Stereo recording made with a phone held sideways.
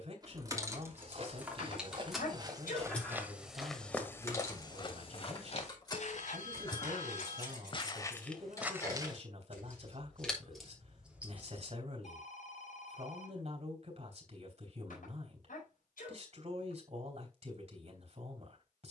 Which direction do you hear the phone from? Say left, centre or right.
left.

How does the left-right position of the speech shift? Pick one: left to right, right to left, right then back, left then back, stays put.
stays put.